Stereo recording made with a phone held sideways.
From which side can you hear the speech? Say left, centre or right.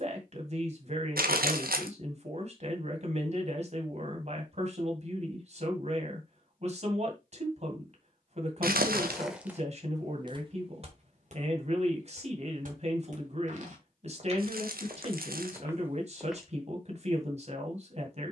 right.